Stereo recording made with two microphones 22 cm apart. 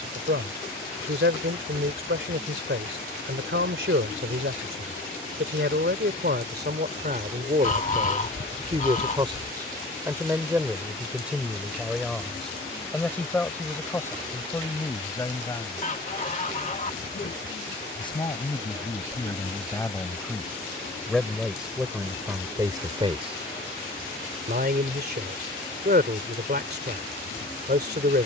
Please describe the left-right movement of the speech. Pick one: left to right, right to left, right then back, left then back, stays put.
left then back.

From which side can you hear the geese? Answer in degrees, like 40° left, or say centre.
30° left.